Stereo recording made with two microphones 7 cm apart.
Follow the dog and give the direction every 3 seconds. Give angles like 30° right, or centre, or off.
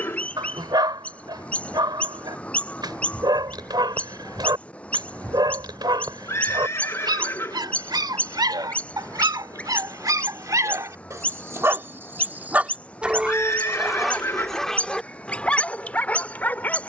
70° right, 70° right, 70° right, 50° right, centre, 20° left.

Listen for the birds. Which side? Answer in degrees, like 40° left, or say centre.
20° left.